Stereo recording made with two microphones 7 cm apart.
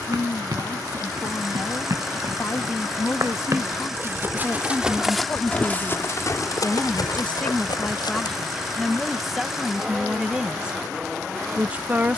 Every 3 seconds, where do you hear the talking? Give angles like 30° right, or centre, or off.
50° left, 40° left, 20° left, 10° right.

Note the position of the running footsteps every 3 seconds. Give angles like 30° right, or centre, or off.
60° right, 10° right, 60° left, off.